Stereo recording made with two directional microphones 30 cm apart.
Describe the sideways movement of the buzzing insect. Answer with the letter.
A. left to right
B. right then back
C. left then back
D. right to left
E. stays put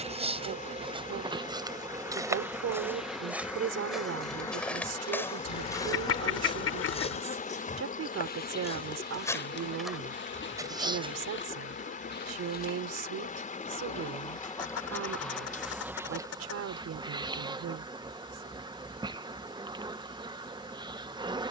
C.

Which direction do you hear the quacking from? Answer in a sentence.
In this clip you hear the quacking on the left.